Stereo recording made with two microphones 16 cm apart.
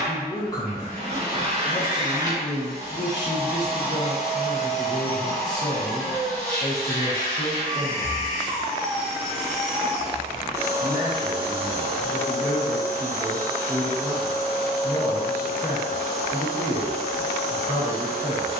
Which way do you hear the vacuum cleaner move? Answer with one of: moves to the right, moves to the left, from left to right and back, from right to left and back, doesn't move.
from right to left and back.